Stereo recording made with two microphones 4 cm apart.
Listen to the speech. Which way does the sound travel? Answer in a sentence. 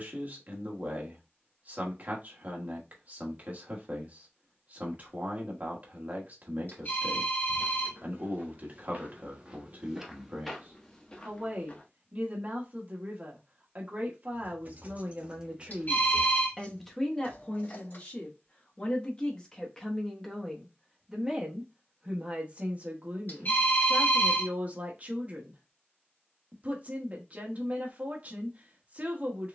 In this clip you hear the speech go left and come back.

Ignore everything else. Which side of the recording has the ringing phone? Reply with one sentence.
You can hear the ringing phone on the left.